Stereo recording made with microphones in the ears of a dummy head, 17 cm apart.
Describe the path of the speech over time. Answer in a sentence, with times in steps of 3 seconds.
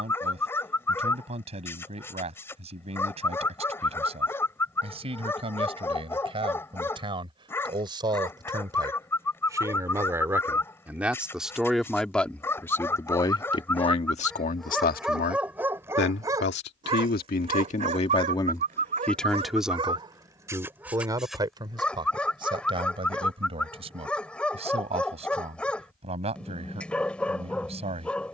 In this clip you hear the speech on the right from 0 s, in the centre from 9 s, on the left from 12 s, in the centre from 18 s and on the right from 21 s.